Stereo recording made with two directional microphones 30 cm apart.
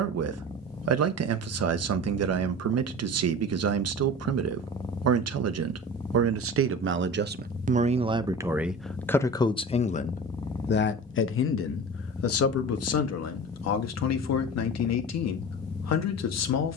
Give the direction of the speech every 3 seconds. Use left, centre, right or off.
right, right, right, left, left, left.